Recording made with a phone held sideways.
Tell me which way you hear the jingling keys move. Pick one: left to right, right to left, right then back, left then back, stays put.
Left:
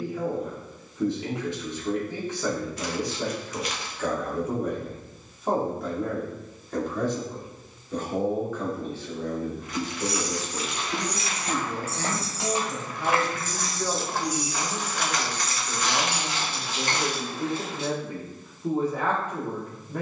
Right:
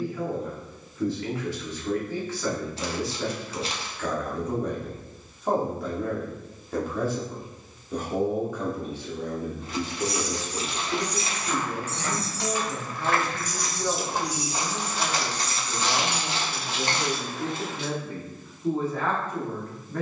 left to right.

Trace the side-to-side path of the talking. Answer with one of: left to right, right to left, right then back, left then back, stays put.
right then back.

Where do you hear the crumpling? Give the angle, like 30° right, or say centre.
30° right.